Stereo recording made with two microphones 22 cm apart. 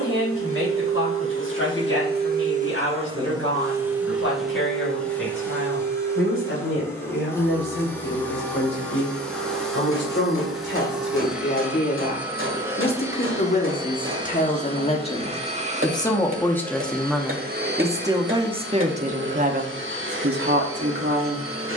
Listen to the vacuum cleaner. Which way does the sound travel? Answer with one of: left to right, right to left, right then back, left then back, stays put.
left then back.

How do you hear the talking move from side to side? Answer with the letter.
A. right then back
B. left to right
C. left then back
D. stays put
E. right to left
B.